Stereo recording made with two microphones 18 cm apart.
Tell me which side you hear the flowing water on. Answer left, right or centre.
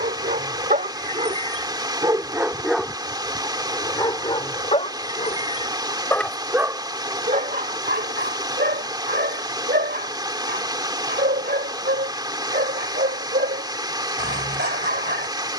right.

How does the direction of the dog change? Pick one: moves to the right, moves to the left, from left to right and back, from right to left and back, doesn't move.
from right to left and back.